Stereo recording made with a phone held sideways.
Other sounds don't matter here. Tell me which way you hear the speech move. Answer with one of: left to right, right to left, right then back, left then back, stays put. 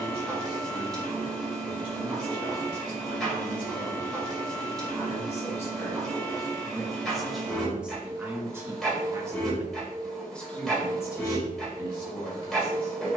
right then back.